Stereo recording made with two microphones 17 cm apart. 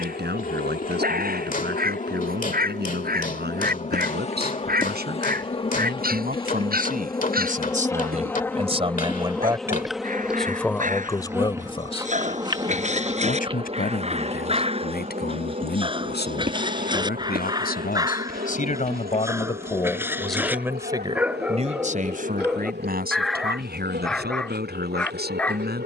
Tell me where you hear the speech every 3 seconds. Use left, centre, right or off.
right, right, right, centre, left, left, left, right, right.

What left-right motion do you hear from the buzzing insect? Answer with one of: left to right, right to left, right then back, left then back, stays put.
left to right.